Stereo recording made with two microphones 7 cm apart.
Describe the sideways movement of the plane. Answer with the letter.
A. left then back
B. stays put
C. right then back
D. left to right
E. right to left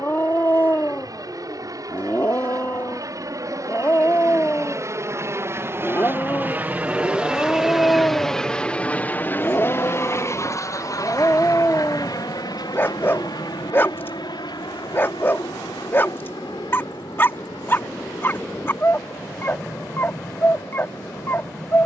E.